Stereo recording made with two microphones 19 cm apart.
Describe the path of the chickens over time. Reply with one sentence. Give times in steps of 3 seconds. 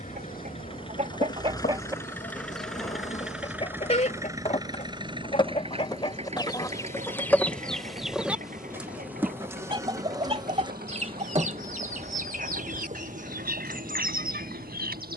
In this clip you hear the chickens on the right from 0 s, on the left from 3 s, in the centre from 6 s and on the right from 9 s.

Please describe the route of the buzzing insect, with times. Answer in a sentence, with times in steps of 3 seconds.
You can hear the buzzing insect on the left from 0 s, in the centre from 6 s and on the right from 9 s.